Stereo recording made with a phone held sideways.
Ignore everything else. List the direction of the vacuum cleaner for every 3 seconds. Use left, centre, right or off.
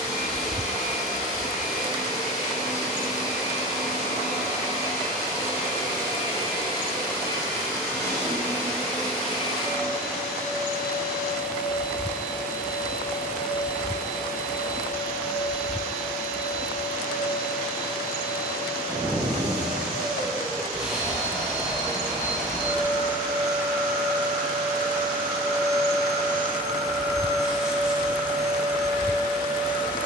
left, left, left, centre, centre, centre, centre, centre, centre, centre.